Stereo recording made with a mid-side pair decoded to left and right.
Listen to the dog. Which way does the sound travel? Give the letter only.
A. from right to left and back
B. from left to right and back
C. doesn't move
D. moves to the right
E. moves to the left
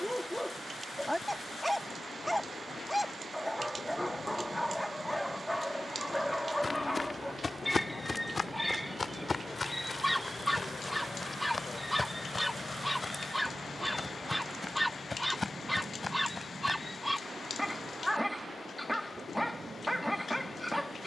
C.